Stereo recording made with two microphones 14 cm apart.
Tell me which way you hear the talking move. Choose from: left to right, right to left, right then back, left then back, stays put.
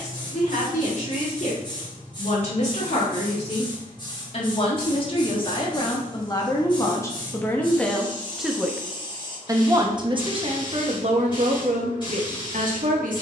left to right.